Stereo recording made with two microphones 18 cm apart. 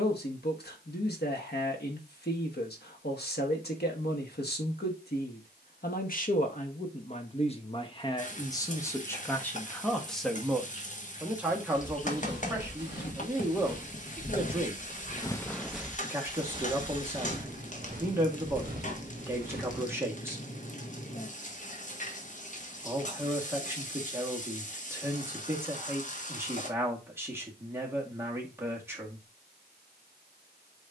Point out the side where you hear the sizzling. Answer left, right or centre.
left.